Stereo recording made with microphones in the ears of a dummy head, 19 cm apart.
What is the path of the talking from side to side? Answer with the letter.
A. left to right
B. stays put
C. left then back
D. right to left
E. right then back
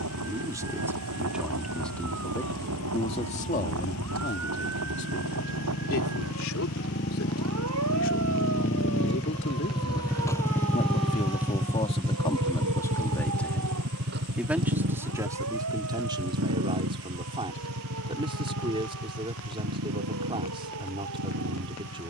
C.